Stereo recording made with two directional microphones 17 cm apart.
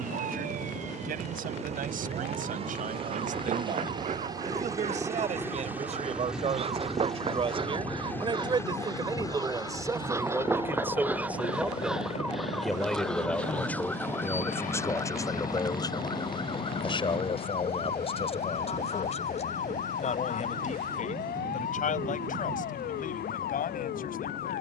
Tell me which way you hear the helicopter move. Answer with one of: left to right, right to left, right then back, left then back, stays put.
right to left.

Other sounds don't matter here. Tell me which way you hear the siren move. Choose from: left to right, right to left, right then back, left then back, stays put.
right to left.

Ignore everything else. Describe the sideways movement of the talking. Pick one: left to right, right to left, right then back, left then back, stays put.
right to left.